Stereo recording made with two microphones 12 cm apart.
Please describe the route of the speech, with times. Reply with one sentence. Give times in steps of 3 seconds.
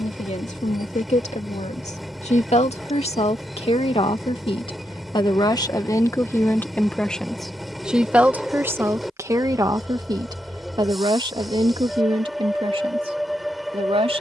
You can hear the speech on the left from 0 s, in the centre from 6 s and on the right from 9 s.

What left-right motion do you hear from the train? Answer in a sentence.
You can hear the train stay in one place.